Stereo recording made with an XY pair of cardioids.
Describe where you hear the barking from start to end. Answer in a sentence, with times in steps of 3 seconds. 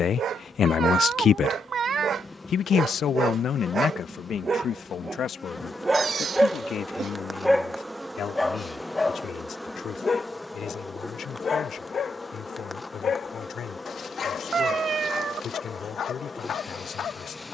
You can hear the barking on the right from 0 s, in the centre from 6 s and on the left from 9 s.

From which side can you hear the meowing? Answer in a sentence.
You can hear the meowing on the right.